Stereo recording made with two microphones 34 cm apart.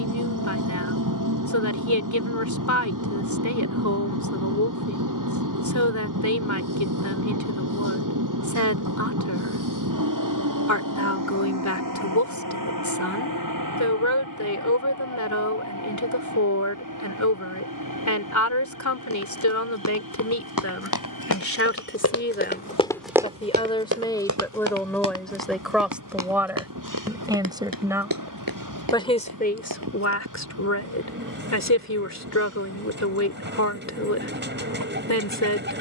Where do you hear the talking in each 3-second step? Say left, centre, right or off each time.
left, left, left, left, left, left, left, left, centre, centre, left, left.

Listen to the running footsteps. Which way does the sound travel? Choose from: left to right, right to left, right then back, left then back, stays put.
left to right.